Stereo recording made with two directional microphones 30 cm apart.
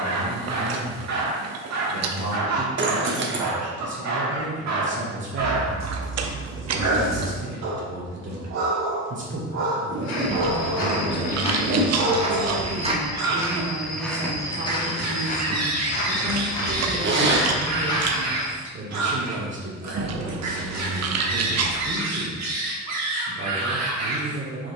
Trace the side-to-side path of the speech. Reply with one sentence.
In this clip you hear the speech stay in one place.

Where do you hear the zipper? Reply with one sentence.
You can hear the zipper on the right.